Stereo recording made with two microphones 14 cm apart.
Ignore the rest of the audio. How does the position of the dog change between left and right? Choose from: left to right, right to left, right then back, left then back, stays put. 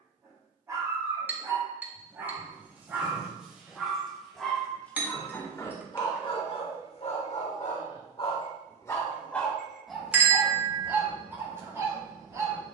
left then back.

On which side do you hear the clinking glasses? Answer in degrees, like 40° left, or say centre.
10° right.